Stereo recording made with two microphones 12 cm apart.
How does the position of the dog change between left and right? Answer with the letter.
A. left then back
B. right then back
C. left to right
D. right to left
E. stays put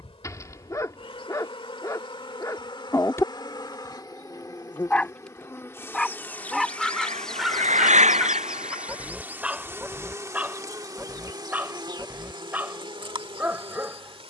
C.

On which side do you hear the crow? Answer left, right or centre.
right.